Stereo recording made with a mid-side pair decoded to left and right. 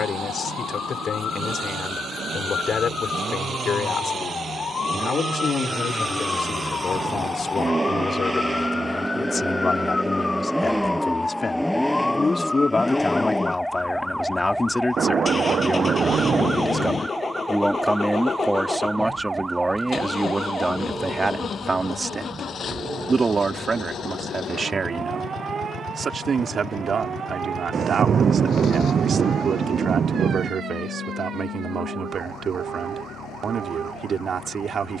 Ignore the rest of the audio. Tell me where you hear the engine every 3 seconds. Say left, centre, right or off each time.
right, right, right, centre, centre, left, left, left, left, left, left, left.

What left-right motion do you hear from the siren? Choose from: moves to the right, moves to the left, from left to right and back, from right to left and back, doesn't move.
moves to the right.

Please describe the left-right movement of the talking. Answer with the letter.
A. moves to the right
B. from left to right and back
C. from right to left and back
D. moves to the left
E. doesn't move
A.